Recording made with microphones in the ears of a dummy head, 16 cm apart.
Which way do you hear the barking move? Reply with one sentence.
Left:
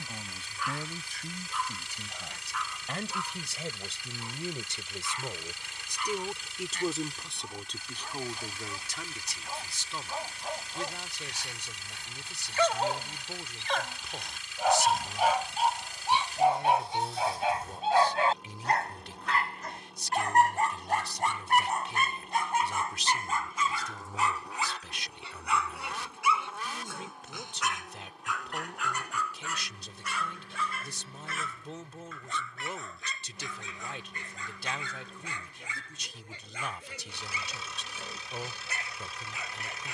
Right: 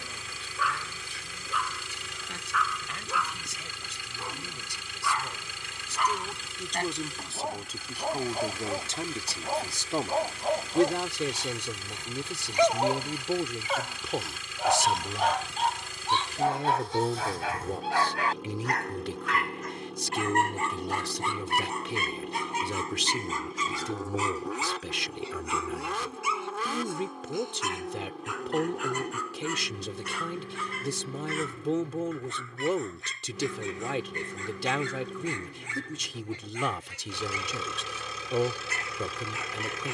In this clip you hear the barking move to the left.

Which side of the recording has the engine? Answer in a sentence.
You can hear the engine on the right.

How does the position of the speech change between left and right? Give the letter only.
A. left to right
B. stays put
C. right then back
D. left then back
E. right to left
A.